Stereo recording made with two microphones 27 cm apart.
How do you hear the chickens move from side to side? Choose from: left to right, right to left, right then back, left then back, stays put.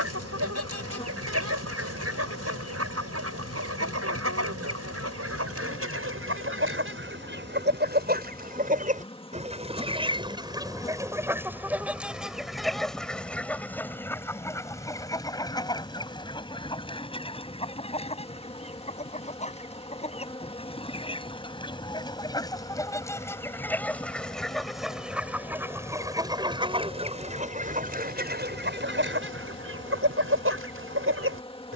left then back.